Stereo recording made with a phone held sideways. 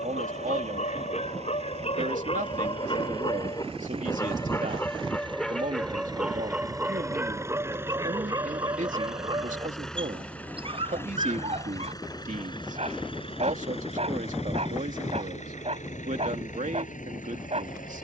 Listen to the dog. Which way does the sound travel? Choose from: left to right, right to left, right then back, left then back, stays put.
left to right.